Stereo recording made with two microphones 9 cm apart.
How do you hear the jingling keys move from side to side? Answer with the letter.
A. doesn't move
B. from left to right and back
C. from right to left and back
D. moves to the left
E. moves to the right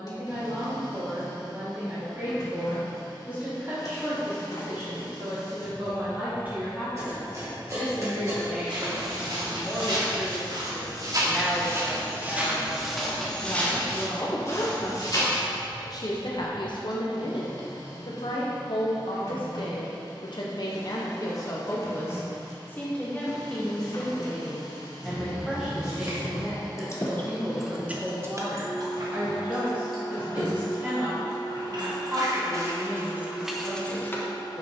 B.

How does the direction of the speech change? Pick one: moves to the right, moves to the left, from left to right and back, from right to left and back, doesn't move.
from right to left and back.